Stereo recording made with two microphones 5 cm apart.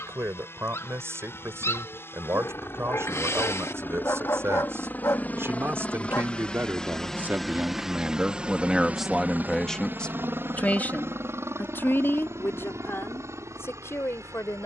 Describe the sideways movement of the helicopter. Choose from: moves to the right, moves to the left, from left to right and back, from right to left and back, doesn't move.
moves to the right.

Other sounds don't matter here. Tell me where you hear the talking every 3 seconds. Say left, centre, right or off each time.
right, right, right, left, left.